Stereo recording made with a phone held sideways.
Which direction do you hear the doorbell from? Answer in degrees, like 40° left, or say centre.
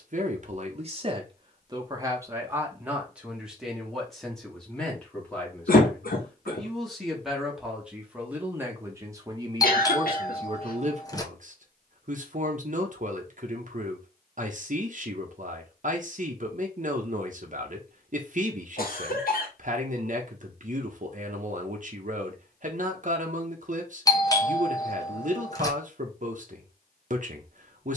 20° left.